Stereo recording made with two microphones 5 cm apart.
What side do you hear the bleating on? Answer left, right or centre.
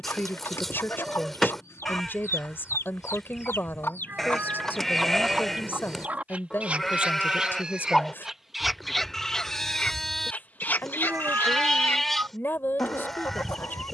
centre.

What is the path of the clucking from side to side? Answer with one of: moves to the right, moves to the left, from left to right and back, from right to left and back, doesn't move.
from left to right and back.